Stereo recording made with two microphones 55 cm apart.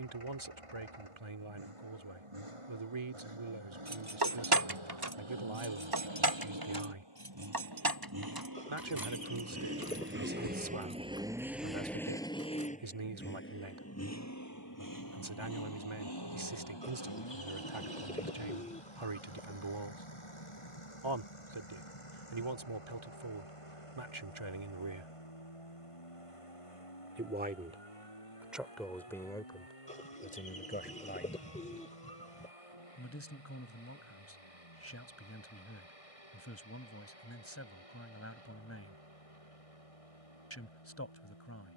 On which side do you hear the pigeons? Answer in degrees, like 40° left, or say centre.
10° left.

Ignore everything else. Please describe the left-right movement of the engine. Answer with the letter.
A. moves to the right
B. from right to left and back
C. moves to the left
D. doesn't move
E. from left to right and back
C.